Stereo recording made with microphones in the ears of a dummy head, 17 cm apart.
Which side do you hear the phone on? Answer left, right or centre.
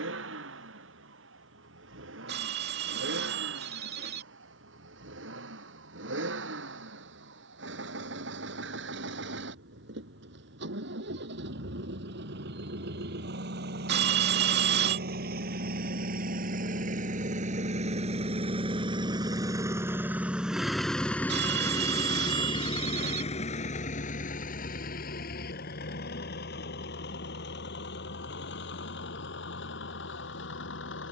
right.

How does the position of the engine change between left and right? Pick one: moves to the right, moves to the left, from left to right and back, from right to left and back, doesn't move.
moves to the left.